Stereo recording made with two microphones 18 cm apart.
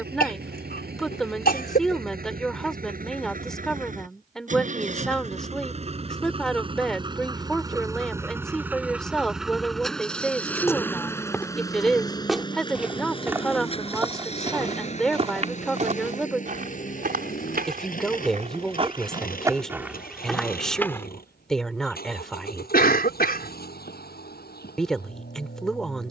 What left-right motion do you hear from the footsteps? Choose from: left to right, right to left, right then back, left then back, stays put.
right then back.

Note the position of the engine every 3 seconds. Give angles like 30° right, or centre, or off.
60° right, 50° right, 20° right, 10° left, 30° left, 50° left, 50° left, 60° left, 60° left.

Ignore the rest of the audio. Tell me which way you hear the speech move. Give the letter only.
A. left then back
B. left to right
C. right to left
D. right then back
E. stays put
E.